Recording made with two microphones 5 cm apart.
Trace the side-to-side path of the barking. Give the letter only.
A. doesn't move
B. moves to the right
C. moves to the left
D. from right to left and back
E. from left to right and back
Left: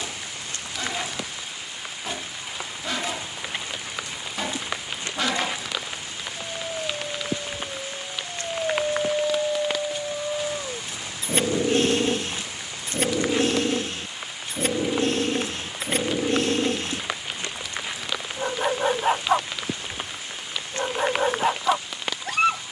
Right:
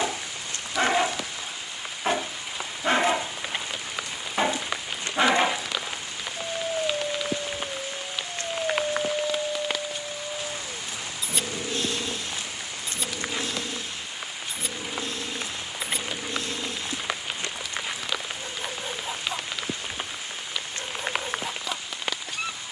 C.